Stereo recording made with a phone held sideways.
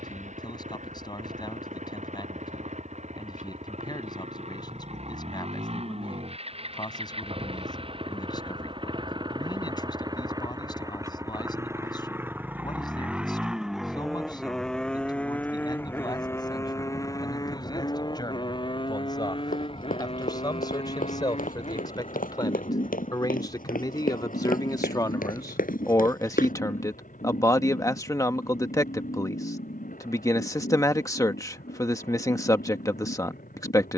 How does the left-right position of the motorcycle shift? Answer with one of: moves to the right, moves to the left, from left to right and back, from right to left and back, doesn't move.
moves to the left.